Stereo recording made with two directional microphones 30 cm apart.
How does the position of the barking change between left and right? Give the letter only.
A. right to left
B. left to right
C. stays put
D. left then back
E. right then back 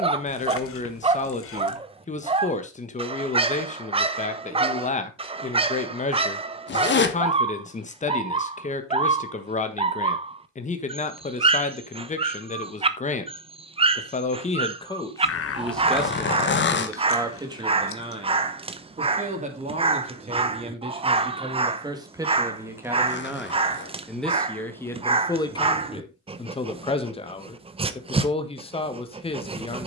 C.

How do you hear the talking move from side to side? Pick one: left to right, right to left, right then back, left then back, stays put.
right then back.